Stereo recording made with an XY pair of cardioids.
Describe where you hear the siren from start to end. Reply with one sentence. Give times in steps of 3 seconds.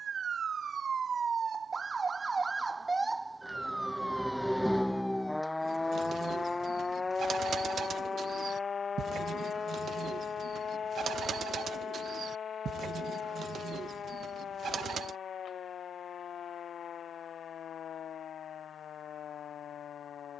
In this clip you hear the siren on the right from 0 s, in the centre from 3 s and on the left from 6 s.